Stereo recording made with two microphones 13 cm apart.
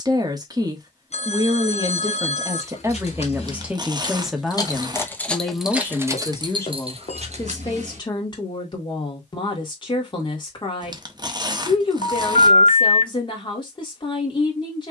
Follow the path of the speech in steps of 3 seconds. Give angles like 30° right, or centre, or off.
30° right, centre, 30° left, 30° left, 30° left.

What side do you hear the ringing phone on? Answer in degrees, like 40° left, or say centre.
50° left.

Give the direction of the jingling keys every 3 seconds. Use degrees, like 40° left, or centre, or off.
50° left, 20° left, 50° right, off, off.